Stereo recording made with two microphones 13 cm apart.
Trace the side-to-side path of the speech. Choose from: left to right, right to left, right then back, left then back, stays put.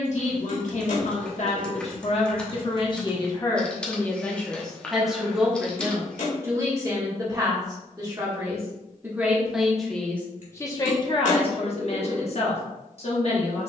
right then back.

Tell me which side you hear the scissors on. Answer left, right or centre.
left.